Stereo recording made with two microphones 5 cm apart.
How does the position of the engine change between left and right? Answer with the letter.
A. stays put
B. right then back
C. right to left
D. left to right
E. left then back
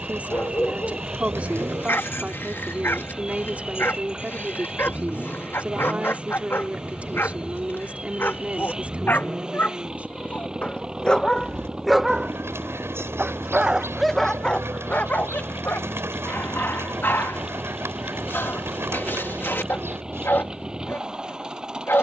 A.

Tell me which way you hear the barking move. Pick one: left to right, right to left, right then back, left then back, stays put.
right then back.